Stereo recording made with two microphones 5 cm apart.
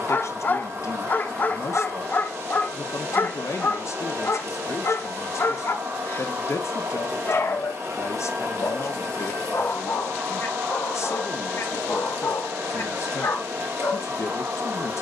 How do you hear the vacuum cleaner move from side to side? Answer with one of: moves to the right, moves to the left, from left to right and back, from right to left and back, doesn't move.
doesn't move.